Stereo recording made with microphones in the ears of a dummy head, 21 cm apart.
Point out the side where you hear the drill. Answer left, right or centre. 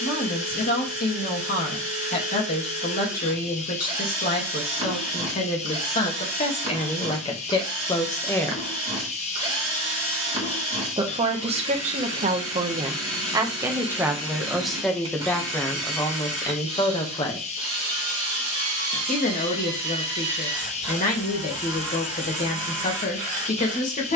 right.